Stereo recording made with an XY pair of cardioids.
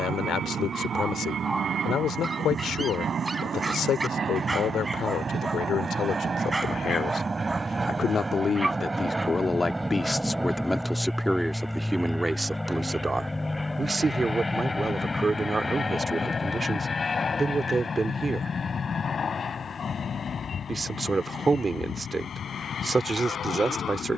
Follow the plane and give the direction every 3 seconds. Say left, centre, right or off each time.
right, right, right, centre, centre, left, left, left.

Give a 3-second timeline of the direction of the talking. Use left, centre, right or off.
left, left, left, centre, right, right, right, right.